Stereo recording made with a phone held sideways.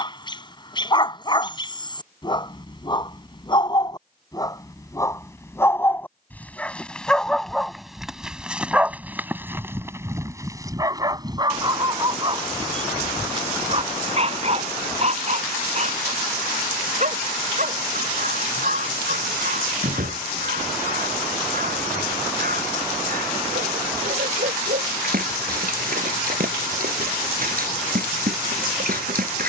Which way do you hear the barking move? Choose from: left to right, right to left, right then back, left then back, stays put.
left to right.